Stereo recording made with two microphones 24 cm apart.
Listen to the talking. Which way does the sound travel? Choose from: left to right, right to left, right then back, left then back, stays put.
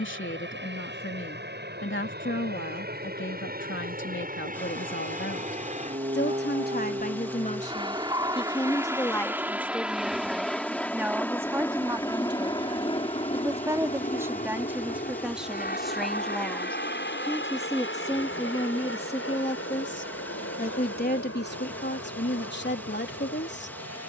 right then back.